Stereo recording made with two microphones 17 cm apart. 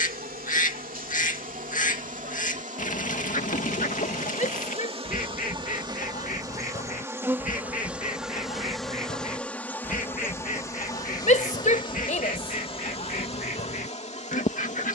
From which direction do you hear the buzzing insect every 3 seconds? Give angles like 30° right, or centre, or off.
50° right, 40° right, 10° right, 20° left, 40° left.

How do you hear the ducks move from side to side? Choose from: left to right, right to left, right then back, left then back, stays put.
stays put.